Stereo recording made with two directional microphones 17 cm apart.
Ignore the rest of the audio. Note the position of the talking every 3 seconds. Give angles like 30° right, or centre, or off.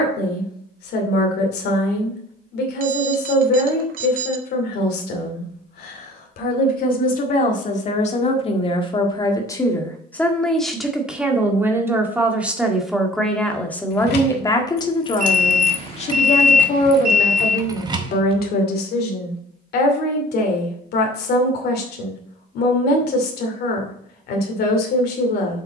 70° left, 60° left, 40° left, centre, 10° left, 40° left, 60° left, 60° left, 60° left.